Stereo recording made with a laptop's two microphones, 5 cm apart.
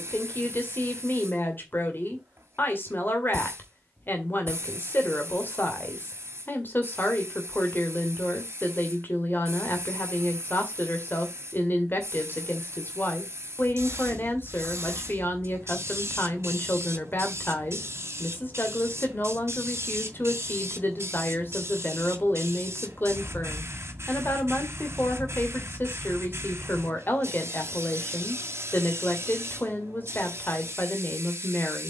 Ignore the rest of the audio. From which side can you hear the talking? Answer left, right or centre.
left.